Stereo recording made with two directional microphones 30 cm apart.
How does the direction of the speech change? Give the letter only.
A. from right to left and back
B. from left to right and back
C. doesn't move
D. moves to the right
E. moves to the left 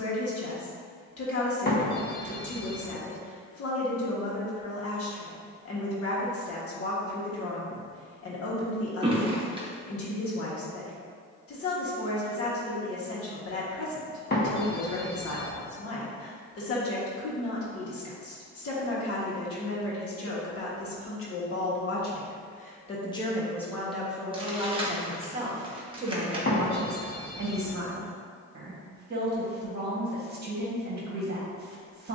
D.